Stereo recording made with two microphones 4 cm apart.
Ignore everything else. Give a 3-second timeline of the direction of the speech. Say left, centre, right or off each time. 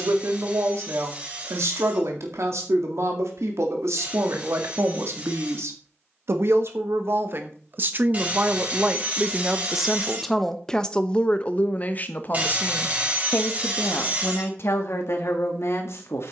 right, right, right, centre, left, left.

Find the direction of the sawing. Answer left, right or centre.
right.